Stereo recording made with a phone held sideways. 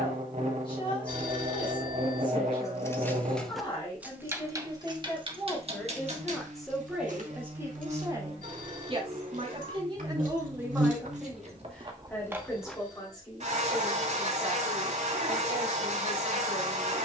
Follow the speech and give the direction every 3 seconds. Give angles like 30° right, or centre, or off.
40° left, 20° left, 10° right, 20° right, 30° left, 30° left.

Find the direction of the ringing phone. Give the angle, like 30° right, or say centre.
70° right.